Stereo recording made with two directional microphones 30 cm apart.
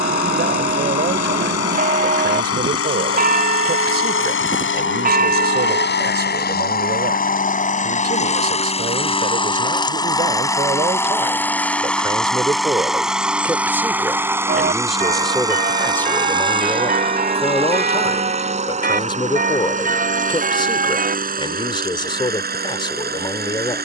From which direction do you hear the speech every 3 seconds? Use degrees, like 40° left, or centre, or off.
30° right, 30° right, 30° right, 20° right, 10° right, 10° left, 20° left, 20° left.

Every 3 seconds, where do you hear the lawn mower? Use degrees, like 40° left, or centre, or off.
50° left, 40° left, 30° left, 10° left, centre, 20° right, 20° right, 30° right.